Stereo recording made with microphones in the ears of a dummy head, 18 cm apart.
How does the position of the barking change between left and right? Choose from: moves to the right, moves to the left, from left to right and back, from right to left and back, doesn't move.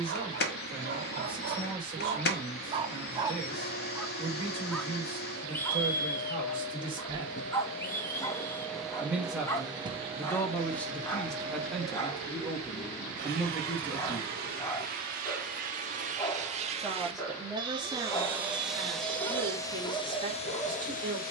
moves to the left.